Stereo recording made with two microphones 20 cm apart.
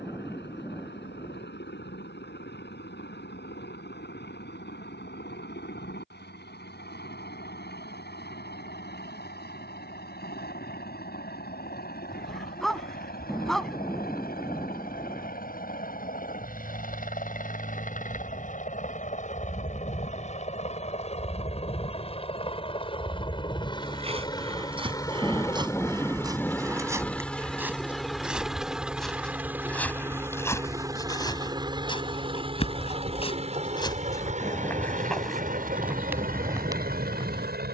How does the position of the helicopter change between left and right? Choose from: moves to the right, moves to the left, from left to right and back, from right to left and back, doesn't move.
moves to the right.